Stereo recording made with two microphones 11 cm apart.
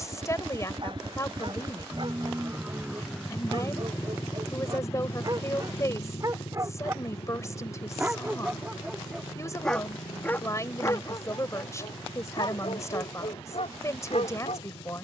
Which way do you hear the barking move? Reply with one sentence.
You can hear the barking move to the left.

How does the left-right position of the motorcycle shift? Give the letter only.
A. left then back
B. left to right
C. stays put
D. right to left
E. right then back
D.